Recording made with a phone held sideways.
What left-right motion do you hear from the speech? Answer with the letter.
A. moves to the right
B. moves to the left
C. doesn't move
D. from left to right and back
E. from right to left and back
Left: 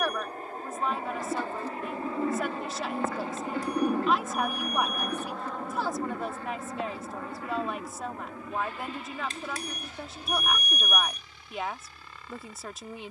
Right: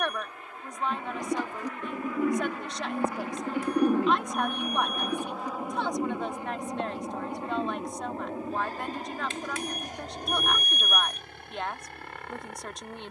C.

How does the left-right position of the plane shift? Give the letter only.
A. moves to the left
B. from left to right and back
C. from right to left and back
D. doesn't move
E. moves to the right
E.